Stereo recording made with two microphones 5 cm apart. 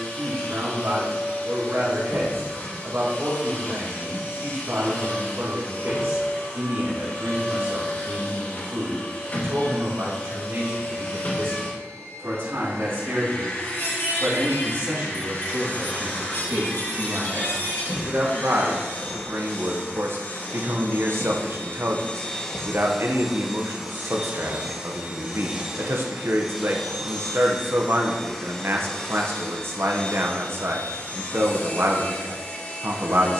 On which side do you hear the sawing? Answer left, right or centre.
left.